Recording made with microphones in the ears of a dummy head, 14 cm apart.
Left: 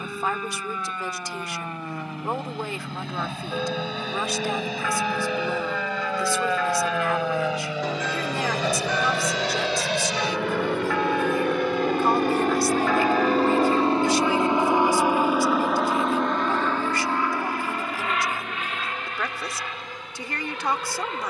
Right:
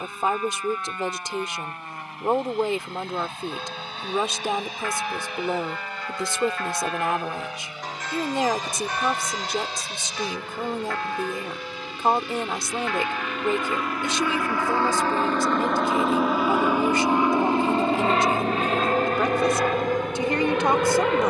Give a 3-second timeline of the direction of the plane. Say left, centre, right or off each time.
left, left, left, left, left, centre, right.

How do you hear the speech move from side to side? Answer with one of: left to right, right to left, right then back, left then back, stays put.
stays put.